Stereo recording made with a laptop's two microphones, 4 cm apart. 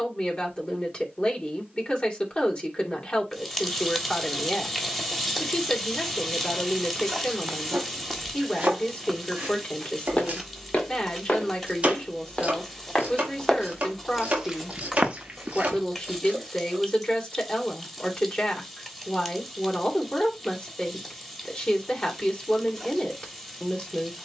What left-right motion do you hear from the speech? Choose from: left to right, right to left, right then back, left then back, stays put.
stays put.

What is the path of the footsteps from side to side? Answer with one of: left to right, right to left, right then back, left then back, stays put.
left then back.